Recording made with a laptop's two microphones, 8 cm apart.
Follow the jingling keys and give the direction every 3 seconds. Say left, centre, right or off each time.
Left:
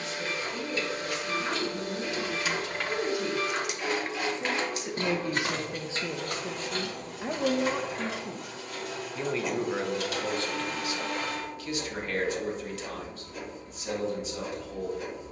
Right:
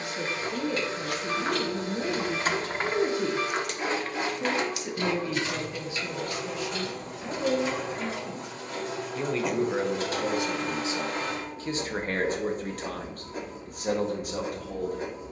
right, left, left, off, off.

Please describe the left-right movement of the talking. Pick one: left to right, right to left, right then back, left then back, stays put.
left then back.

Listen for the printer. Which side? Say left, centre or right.
right.